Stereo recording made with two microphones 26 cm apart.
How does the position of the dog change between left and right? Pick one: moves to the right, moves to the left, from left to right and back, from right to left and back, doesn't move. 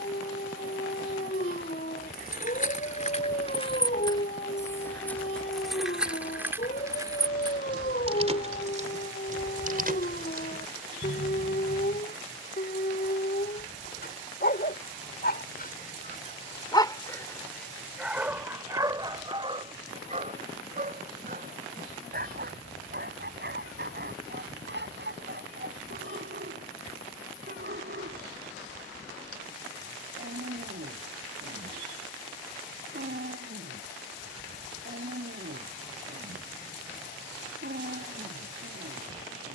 moves to the right.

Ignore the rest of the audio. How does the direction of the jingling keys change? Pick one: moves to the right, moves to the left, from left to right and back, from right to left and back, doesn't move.
moves to the right.